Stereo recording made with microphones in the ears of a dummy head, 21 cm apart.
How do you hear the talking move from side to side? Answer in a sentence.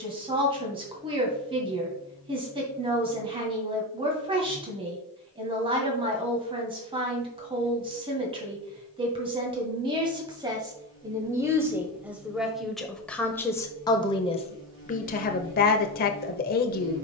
In this clip you hear the talking move from right to left.